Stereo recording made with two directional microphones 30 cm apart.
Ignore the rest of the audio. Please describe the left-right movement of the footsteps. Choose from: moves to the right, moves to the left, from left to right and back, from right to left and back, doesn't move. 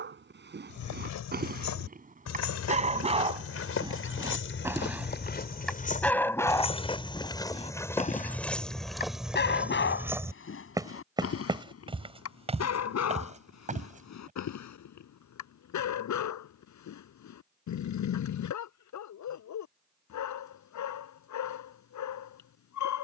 moves to the right.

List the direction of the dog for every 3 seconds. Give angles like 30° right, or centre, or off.
30° right, 10° right, 20° left, 40° left, 60° left, 70° left, 70° left, 70° left.